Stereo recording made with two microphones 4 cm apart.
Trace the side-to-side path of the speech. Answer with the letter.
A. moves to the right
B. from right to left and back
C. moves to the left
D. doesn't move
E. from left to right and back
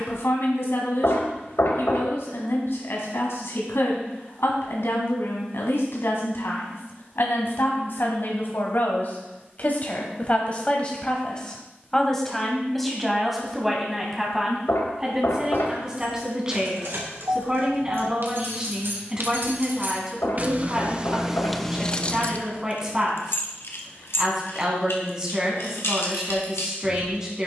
A.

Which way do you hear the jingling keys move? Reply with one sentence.
In this clip you hear the jingling keys travel towards the left.